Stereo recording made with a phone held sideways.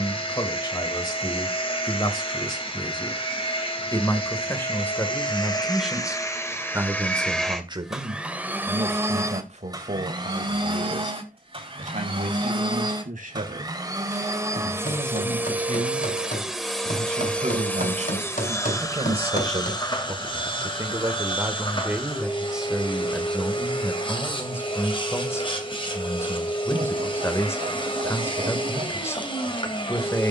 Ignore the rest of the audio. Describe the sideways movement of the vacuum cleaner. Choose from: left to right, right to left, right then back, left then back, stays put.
right then back.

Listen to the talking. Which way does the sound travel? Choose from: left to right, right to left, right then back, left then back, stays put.
right then back.